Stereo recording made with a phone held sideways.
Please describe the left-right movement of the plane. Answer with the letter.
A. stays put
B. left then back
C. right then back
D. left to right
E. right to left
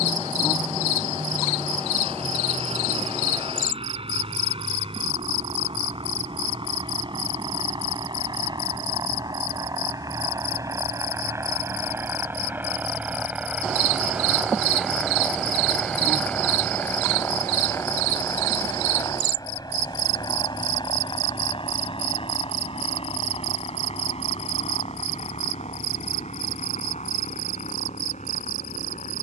E.